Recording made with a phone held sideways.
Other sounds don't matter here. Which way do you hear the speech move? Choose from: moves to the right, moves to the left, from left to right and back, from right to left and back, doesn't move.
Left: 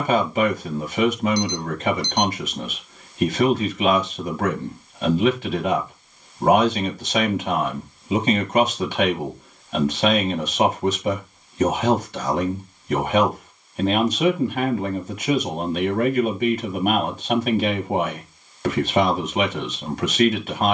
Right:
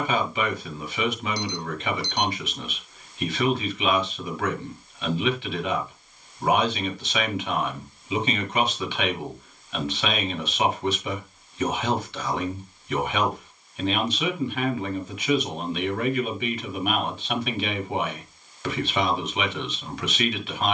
doesn't move.